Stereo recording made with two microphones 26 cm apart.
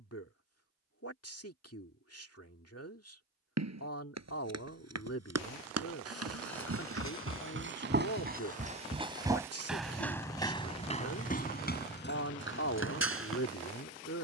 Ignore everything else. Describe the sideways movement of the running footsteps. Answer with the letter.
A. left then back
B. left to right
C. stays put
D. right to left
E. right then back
D.